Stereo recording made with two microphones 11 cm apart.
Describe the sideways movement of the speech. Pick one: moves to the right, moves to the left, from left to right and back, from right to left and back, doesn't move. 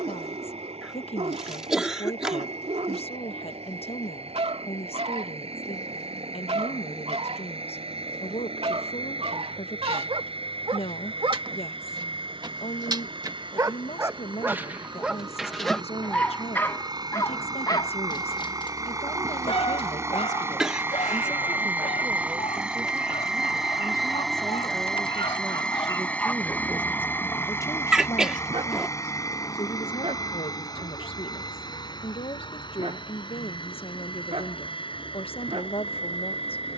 from left to right and back.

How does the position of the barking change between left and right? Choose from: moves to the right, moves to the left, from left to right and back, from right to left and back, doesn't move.
from right to left and back.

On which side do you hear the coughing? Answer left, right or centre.
centre.